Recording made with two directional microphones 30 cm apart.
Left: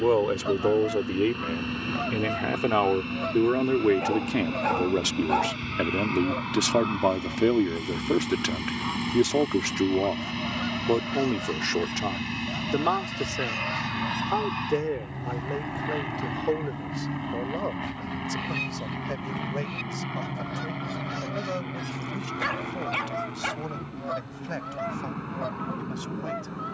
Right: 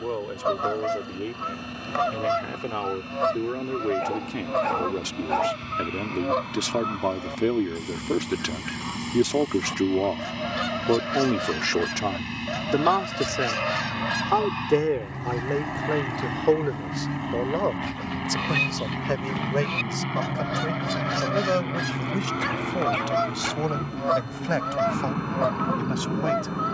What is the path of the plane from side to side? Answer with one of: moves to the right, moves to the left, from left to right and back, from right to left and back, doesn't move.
moves to the right.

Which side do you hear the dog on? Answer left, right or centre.
centre.